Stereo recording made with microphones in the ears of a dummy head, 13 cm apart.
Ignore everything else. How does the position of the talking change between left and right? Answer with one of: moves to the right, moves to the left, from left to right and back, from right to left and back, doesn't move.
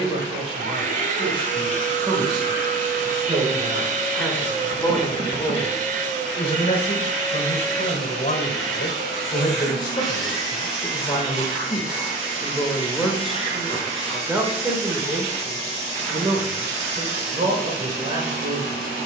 from right to left and back.